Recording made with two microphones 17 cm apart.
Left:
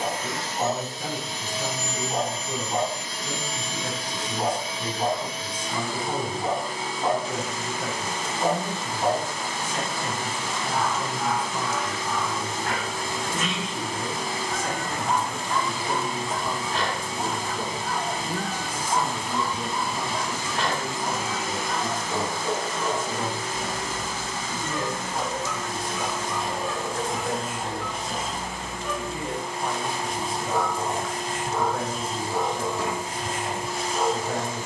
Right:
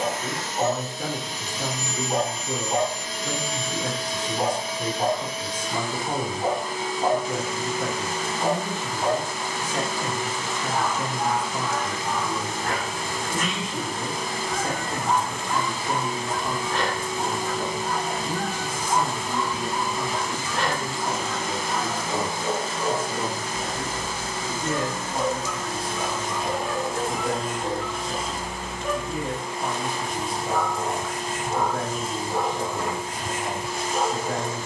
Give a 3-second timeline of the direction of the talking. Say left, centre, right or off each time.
right, right, right, right, right, centre, centre, right, right, right, right, right.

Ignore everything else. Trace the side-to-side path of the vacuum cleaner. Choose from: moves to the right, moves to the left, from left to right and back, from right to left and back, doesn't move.
from left to right and back.